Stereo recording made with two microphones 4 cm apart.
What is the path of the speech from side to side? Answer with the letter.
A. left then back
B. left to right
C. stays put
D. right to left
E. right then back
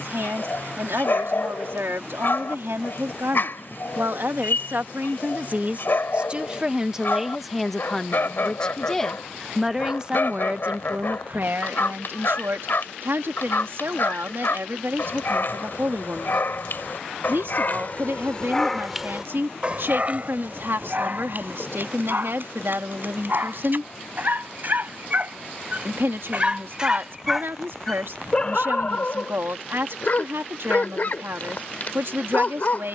A.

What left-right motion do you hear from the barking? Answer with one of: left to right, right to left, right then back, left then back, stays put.
right then back.